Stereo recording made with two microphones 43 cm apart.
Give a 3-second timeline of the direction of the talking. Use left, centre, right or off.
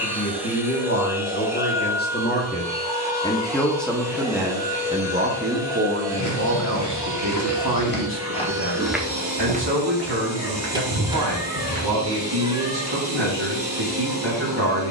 left, centre, right, right, right.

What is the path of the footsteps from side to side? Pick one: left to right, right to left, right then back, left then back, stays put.
left to right.